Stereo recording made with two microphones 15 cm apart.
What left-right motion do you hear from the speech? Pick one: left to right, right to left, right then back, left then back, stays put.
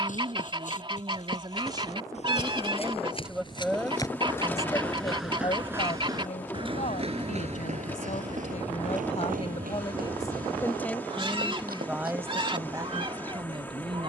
left then back.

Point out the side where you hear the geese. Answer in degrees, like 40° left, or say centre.
30° right.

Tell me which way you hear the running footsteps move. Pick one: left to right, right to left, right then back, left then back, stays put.
left to right.